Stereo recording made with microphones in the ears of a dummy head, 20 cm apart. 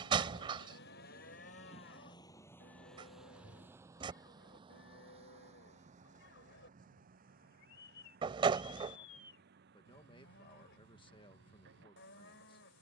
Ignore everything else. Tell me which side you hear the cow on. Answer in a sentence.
You can hear the cow on the left.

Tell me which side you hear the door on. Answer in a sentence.
You can hear the door on the right.